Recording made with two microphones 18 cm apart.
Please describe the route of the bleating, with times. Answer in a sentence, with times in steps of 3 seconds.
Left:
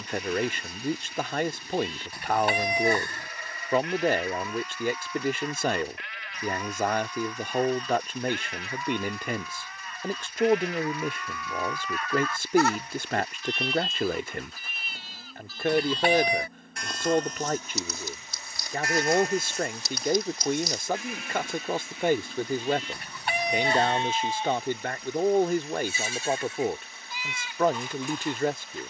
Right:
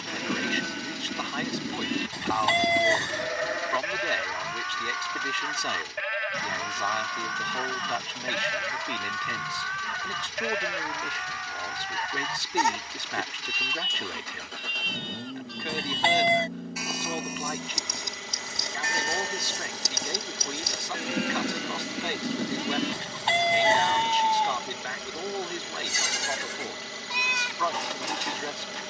In this clip you hear the bleating on the right from 0 s, in the centre from 12 s and on the right from 18 s.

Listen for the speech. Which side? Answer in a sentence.
You can hear the speech on the left.